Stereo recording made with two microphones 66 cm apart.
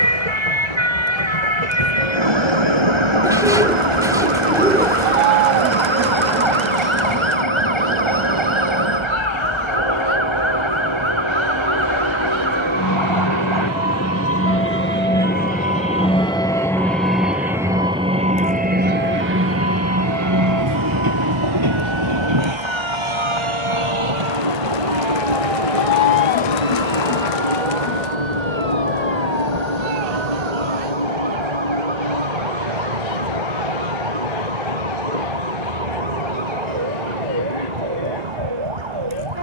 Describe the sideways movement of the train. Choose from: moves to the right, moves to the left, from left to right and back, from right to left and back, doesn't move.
moves to the right.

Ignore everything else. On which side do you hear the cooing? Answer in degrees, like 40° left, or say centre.
10° right.